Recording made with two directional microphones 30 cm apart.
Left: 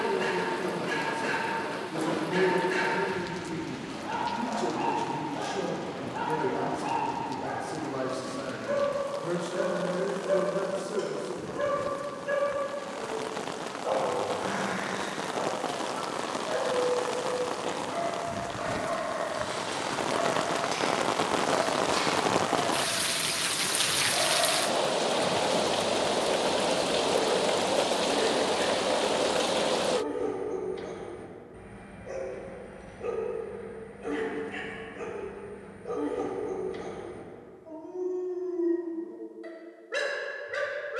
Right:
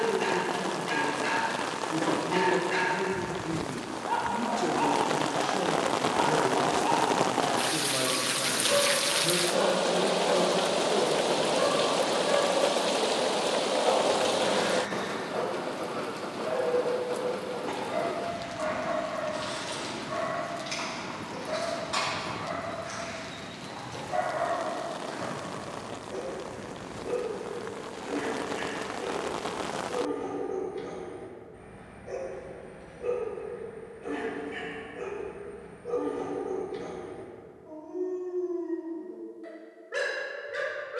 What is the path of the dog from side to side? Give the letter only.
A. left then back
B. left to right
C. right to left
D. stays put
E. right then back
C.